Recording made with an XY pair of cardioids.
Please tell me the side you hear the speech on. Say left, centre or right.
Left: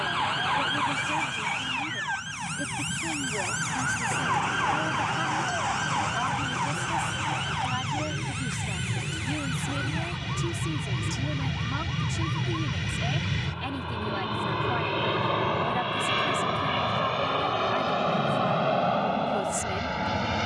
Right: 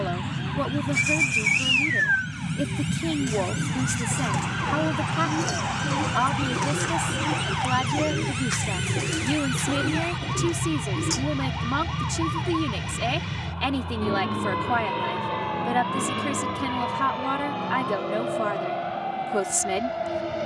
right.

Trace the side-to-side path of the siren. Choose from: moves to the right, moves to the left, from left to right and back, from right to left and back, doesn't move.
moves to the right.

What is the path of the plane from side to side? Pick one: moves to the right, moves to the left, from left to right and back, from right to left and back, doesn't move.
moves to the left.